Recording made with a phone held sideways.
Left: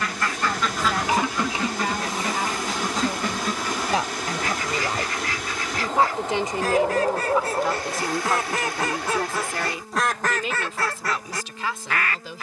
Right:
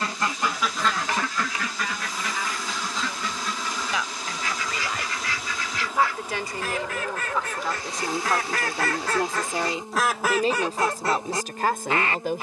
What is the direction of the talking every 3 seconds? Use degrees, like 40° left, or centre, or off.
50° left, 40° left, 10° left, 40° right.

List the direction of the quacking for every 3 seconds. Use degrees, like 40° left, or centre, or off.
20° left, 50° left, 30° left, 10° right.